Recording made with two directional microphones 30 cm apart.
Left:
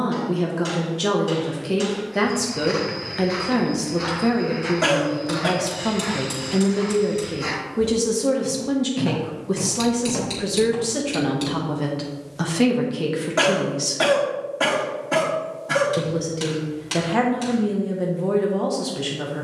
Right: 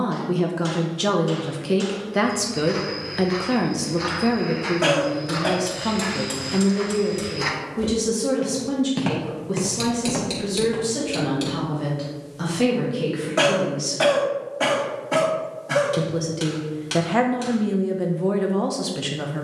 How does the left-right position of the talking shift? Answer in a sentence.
In this clip you hear the talking go left and come back.